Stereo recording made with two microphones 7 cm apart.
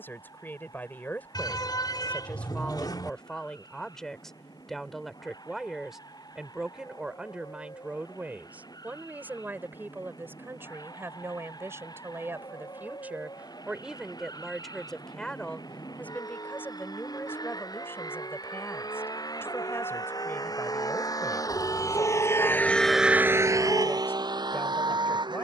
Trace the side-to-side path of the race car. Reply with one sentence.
In this clip you hear the race car move from left to right.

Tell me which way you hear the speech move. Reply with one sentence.
In this clip you hear the speech move from left to right and back again.